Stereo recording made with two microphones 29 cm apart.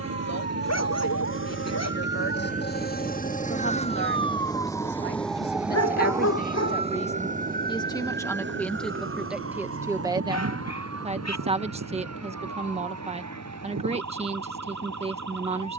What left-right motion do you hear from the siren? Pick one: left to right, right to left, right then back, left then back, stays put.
left to right.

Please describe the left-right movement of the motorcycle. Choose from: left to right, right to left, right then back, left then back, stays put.
right to left.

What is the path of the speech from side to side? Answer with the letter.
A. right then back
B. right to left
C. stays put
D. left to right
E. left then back
D.